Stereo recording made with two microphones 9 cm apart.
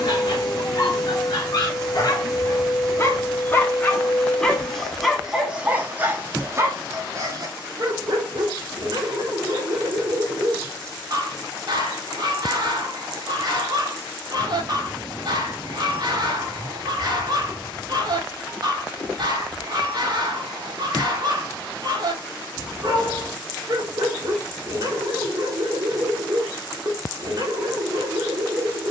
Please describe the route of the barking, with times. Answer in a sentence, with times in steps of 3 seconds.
In this clip you hear the barking on the left from 0 s, in the centre from 3 s and on the right from 6 s.